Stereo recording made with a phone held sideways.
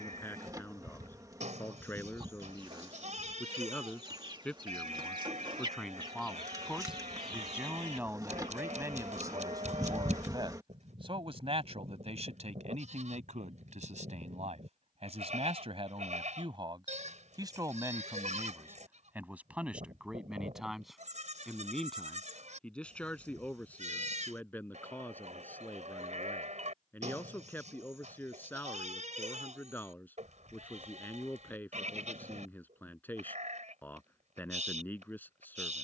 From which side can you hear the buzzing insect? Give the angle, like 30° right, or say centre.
20° right.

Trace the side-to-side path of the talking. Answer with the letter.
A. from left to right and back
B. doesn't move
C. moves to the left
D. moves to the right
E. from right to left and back
A.